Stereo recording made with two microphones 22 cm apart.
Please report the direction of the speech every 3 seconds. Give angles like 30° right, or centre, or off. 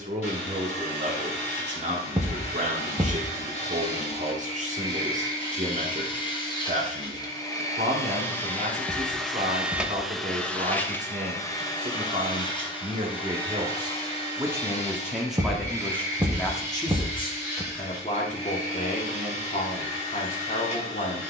30° right, 30° right, 30° right, 30° right, 20° right, 10° left, 40° left.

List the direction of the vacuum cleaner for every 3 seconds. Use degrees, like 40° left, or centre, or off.
30° left, 30° left, 20° left, 10° left, 20° left, 30° left, 30° left.